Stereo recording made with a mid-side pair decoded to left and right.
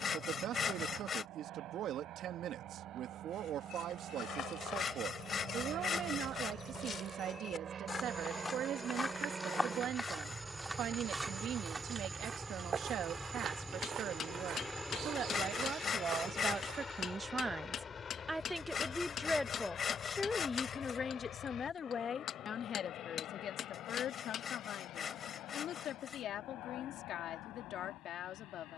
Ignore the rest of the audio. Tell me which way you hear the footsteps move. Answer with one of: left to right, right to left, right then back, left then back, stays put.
left to right.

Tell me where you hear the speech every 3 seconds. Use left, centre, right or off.
right, right, right, right, right, right, centre, left, left, left.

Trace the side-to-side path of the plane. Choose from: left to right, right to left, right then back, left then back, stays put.
right to left.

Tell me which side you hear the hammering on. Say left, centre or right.
left.